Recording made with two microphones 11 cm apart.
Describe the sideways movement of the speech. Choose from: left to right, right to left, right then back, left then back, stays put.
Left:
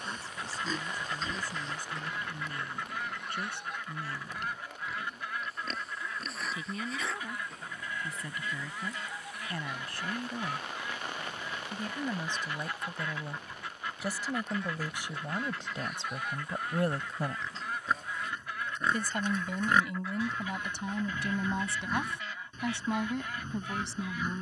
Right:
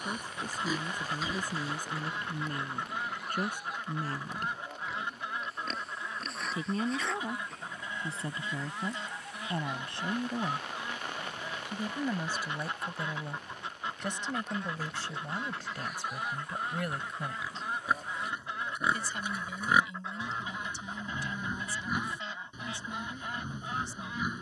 right to left.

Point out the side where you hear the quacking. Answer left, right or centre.
right.